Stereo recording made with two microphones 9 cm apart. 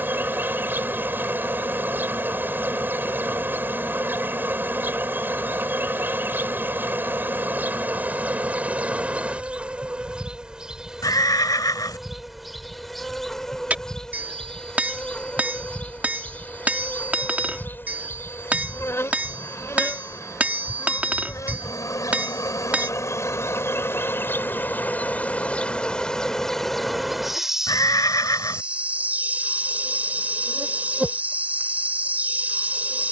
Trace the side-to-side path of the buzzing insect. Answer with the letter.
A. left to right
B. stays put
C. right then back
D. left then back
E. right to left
D.